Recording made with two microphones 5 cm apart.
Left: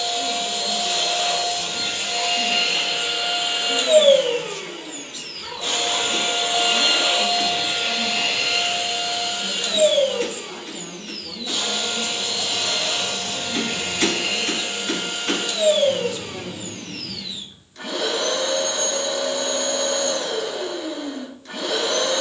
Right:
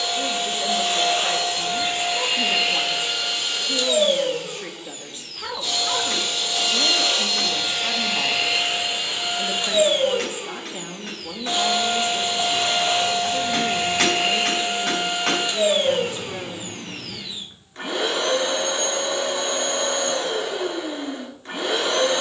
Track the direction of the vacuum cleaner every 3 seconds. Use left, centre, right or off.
right, left, centre, right, right, right, right, right.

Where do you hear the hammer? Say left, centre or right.
right.